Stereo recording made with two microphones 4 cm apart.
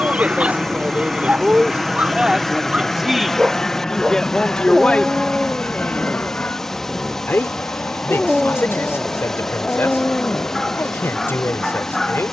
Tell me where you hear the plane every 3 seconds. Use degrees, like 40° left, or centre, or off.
10° right, 20° left, 40° left, 50° left.